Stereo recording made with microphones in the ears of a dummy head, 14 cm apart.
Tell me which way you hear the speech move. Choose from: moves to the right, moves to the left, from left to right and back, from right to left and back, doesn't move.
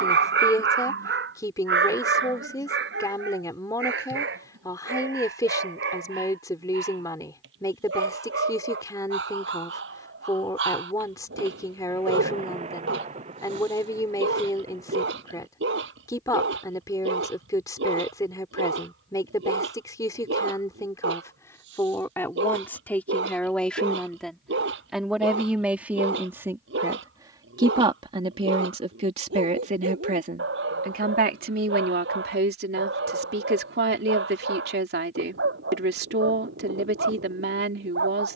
moves to the right.